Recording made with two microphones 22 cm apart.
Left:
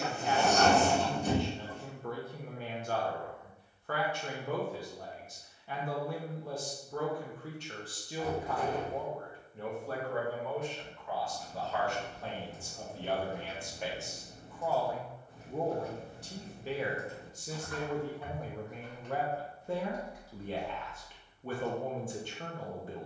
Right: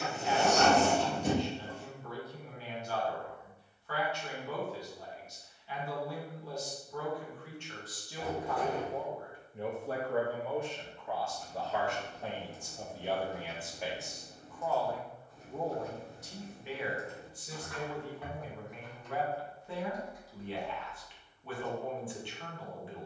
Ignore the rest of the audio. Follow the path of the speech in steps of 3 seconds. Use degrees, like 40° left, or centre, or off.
50° left, 50° left, 30° left, 20° right, 10° right, 30° left, 40° left, 40° left.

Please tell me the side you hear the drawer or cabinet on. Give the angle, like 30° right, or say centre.
70° right.